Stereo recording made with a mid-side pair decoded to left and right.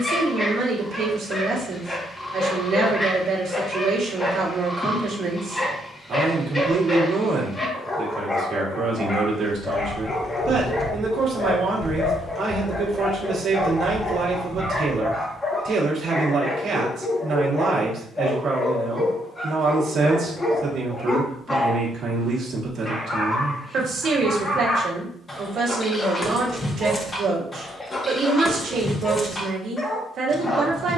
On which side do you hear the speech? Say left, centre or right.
right.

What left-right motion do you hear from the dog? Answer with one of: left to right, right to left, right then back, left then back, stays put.
stays put.